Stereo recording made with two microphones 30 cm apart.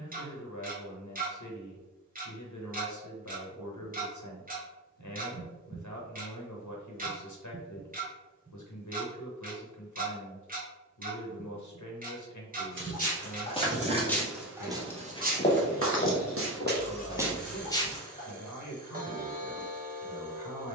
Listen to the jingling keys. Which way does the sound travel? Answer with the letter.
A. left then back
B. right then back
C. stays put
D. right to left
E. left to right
A.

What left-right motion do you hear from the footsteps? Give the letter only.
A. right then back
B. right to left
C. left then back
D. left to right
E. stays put
A.